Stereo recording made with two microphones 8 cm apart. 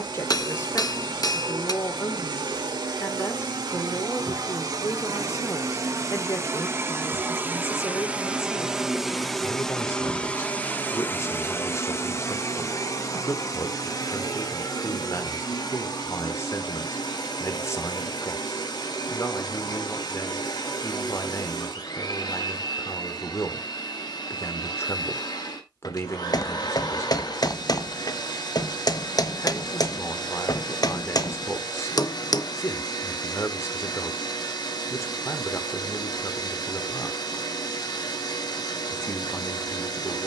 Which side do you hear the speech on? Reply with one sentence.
You can hear the speech on the left.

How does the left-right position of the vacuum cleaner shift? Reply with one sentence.
In this clip you hear the vacuum cleaner move from right to left.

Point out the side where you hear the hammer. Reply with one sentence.
In this clip you hear the hammer on the left.